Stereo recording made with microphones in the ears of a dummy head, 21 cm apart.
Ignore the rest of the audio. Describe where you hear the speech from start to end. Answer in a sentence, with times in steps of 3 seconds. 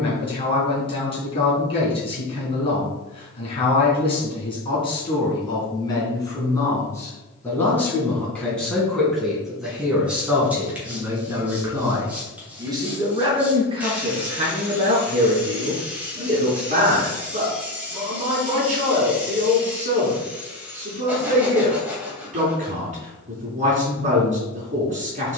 You can hear the speech on the left from 0 s, in the centre from 6 s and on the right from 12 s.